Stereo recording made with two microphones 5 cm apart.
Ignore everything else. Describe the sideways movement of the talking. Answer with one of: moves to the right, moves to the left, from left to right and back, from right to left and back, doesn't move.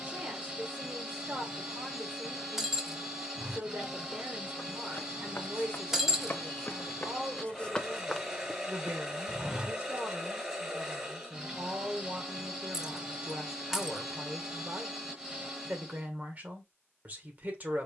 doesn't move.